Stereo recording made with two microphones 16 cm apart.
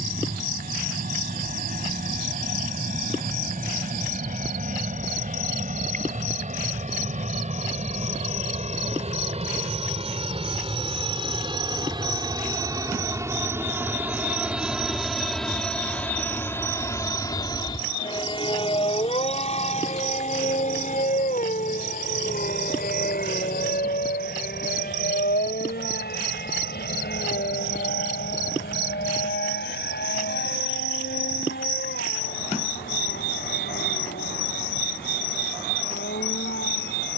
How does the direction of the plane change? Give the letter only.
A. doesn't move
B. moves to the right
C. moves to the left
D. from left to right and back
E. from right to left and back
C.